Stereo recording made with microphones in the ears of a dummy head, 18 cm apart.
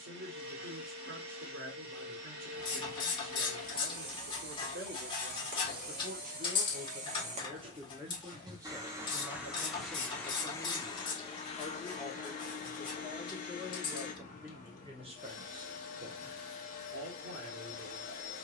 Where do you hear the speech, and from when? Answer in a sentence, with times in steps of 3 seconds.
In this clip you hear the speech on the right from 0 s, in the centre from 9 s and on the right from 15 s.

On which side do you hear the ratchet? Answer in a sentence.
You can hear the ratchet on the left.